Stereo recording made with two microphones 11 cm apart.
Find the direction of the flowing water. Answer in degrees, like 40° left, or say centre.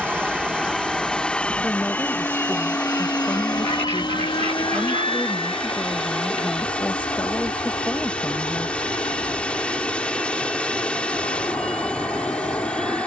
10° left.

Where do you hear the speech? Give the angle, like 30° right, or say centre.
10° left.